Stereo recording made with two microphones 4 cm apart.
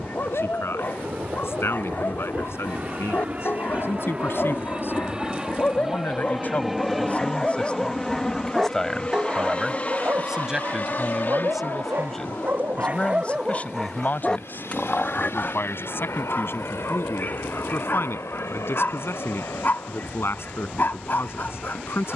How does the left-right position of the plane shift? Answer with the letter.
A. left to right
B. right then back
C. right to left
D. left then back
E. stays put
C.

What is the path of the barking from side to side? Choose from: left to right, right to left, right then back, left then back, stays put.
right then back.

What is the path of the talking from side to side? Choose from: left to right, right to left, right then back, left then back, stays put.
right then back.